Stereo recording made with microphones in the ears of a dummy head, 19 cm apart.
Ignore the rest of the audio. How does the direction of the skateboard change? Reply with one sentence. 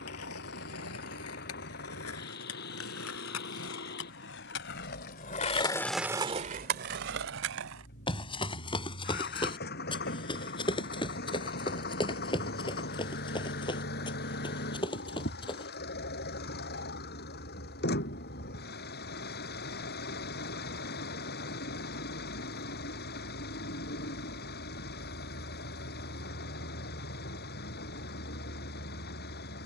You can hear the skateboard move from left to right.